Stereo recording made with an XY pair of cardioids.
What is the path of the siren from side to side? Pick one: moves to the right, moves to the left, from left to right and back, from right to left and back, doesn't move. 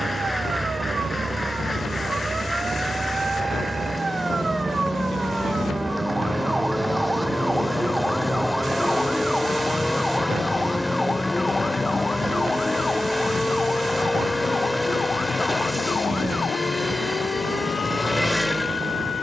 moves to the left.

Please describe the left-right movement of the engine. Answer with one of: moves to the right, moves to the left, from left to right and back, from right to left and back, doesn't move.
doesn't move.